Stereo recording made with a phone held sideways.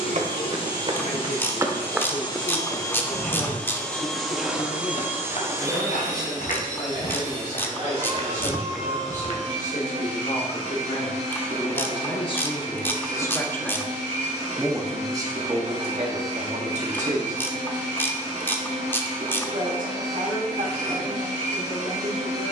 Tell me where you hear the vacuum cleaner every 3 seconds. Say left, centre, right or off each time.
left, centre, right, right, right, right, right, right.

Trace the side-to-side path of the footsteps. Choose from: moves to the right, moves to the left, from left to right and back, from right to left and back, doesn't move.
from right to left and back.